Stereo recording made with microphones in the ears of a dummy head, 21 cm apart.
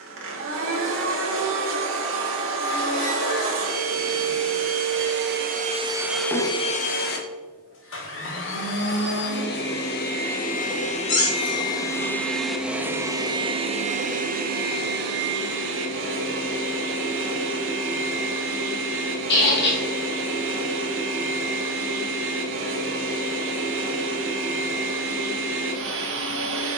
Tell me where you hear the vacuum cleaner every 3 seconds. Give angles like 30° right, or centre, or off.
60° right, 50° right, 40° left, 30° left, 20° right, 60° right, 60° right, 60° right, 60° right.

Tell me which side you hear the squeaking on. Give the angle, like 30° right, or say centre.
50° left.